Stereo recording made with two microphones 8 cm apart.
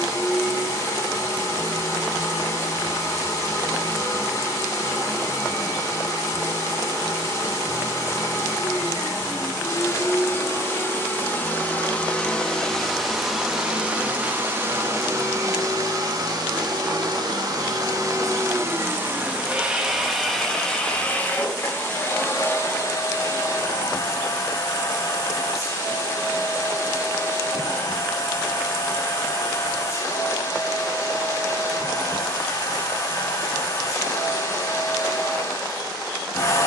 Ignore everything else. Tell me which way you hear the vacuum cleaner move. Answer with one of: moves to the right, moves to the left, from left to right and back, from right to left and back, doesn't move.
from left to right and back.